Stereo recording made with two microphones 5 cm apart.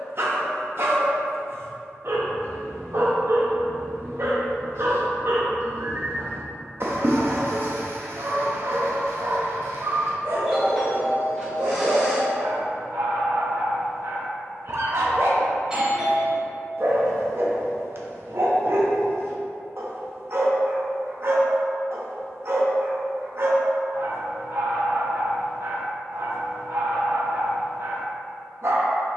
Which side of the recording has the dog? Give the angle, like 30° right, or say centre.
50° right.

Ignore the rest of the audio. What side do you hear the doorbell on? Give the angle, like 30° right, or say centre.
20° right.